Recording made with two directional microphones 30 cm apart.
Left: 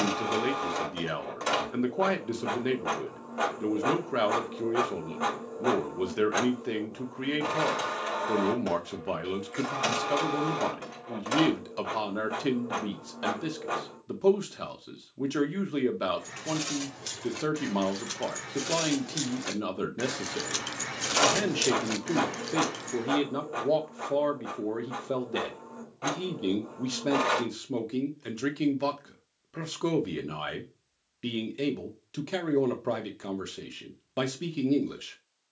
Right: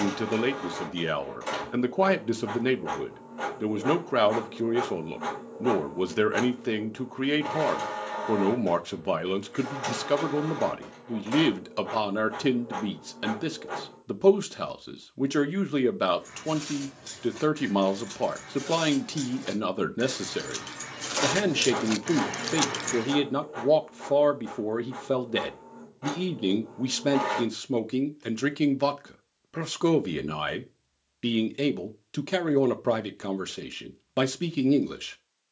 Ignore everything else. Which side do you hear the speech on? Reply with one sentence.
In this clip you hear the speech on the right.